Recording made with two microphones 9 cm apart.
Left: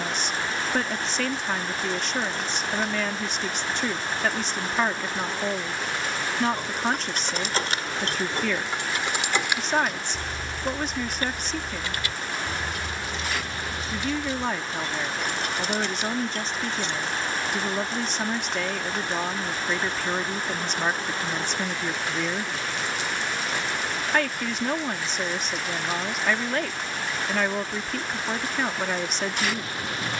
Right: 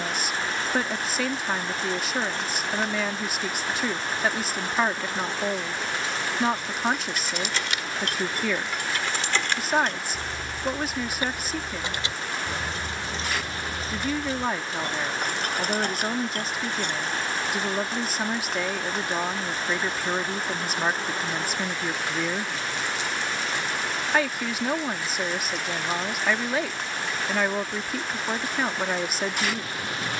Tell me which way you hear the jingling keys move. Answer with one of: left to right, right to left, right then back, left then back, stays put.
left to right.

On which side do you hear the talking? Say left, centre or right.
centre.